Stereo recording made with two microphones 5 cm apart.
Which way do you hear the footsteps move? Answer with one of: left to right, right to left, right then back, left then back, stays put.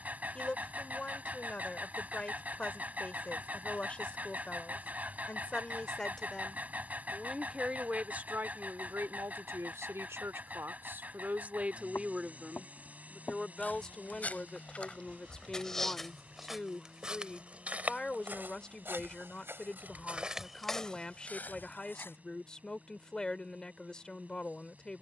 right then back.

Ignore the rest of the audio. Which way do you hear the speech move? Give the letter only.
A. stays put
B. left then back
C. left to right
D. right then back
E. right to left
D.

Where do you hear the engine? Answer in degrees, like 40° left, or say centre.
30° right.